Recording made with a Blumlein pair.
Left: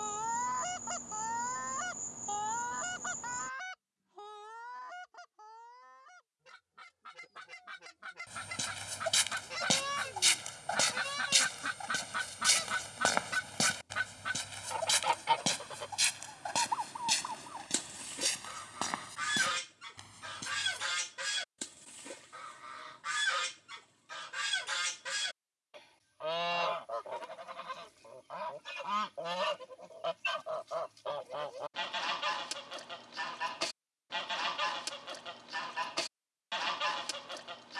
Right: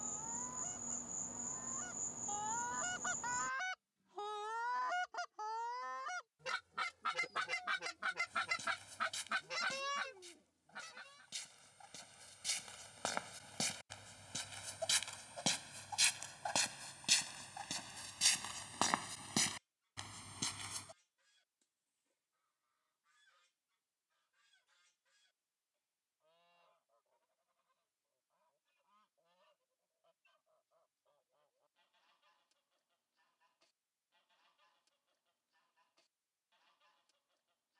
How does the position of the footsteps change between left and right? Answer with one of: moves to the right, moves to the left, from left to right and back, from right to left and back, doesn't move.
moves to the right.